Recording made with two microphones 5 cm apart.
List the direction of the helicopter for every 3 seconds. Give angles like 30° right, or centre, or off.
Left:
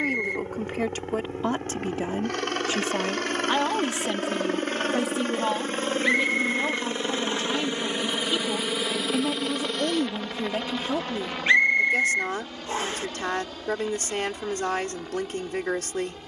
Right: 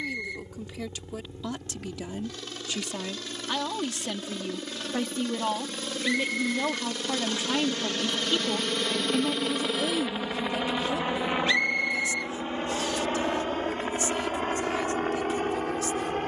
60° left, 50° left, 20° left, 10° right, 40° right, 50° right.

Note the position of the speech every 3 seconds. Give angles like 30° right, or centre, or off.
50° left, 20° left, 10° right, 30° left, 60° left, 60° left.